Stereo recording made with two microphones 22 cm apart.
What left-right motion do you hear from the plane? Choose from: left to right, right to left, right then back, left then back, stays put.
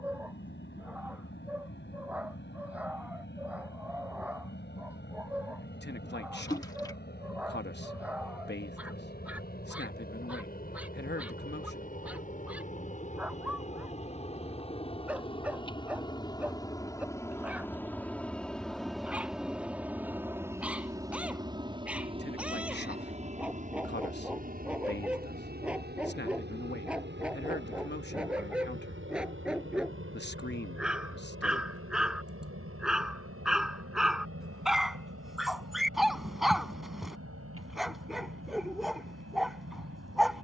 left to right.